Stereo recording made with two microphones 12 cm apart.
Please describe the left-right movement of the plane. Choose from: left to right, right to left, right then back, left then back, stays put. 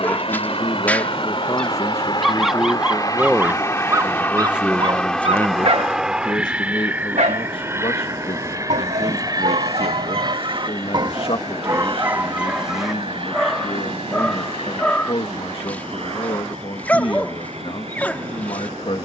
left to right.